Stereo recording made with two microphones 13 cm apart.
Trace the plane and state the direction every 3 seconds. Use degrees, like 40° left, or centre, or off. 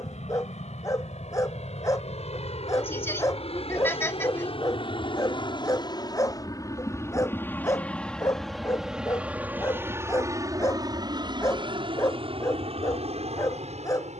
60° left, 50° left, 10° left, 20° right, 50° right.